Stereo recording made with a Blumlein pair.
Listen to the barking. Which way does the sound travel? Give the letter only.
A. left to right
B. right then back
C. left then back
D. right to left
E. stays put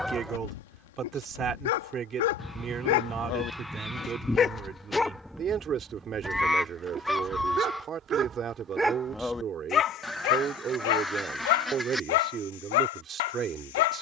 B.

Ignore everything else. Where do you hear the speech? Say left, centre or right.
right.